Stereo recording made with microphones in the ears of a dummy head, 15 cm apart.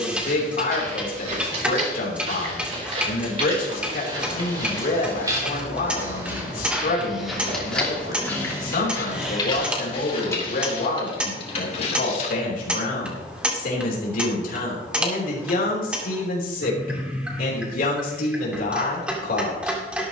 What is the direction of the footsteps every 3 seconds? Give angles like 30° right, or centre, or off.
40° right, 30° right, centre, 30° left, off, off, off.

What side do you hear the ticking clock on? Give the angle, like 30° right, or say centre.
10° right.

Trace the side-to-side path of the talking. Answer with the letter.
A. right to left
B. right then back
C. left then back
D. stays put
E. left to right
D.